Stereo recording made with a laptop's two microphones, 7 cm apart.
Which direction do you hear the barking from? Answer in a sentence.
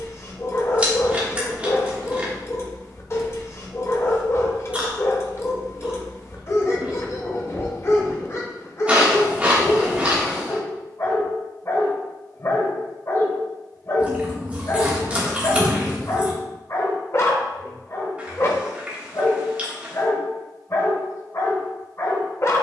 In this clip you hear the barking on the left.